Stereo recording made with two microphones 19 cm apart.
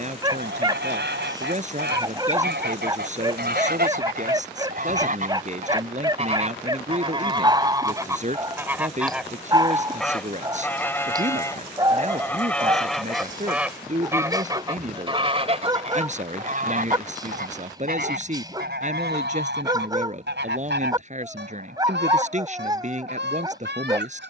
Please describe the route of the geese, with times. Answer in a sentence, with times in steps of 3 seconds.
You can hear the geese on the right from 0 s, in the centre from 9 s and on the right from 15 s.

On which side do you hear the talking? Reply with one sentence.
In this clip you hear the talking on the right.